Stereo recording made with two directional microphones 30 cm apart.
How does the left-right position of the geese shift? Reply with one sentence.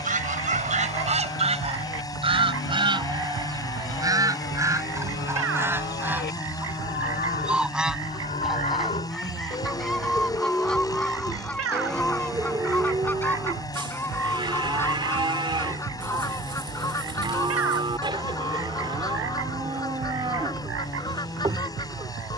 In this clip you hear the geese go from the right side to the left.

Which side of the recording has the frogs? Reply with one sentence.
You can hear the frogs on the right.